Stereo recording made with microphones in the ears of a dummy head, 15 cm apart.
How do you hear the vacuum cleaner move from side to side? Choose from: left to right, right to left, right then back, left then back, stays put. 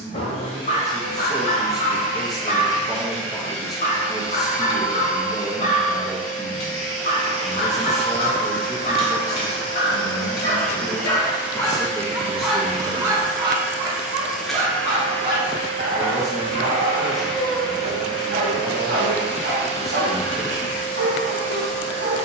right then back.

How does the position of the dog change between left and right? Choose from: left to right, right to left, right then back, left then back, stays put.
left to right.